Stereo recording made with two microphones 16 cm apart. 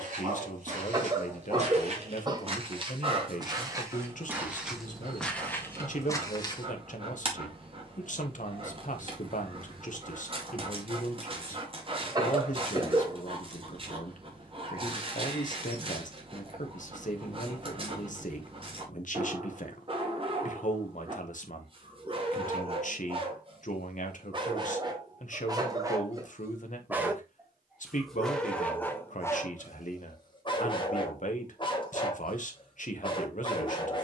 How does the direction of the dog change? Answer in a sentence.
You can hear the dog move from right to left.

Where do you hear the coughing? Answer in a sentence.
You can hear the coughing on the right.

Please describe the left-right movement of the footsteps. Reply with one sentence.
In this clip you hear the footsteps go from the right side to the left.